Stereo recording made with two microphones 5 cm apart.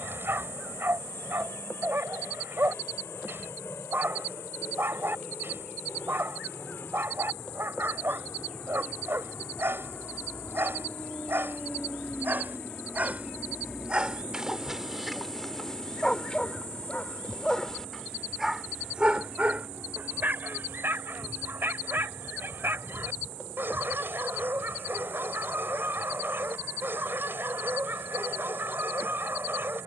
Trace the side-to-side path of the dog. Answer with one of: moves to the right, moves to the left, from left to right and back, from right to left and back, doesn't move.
from right to left and back.